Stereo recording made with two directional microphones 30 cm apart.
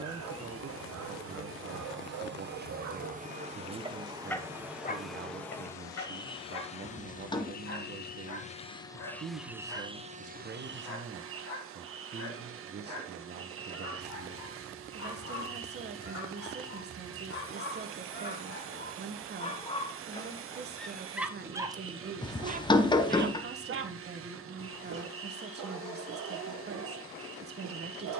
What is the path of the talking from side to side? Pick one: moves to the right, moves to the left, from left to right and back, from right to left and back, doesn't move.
doesn't move.